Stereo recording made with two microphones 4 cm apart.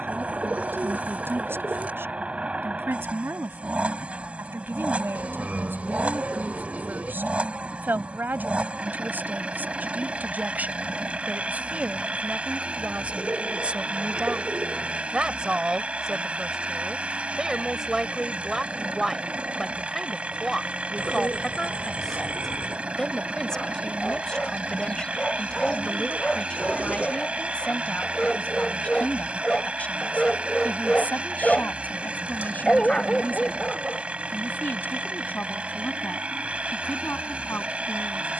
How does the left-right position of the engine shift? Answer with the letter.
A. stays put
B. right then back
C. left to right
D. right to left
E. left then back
A.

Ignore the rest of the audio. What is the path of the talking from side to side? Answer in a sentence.
You can hear the talking move from right to left.